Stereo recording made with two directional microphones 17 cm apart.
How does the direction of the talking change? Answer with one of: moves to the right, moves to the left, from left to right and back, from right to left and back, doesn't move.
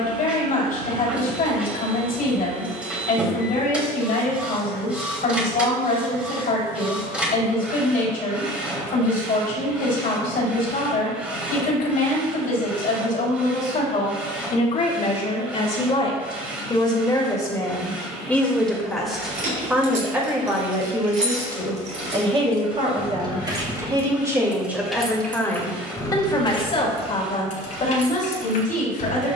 from left to right and back.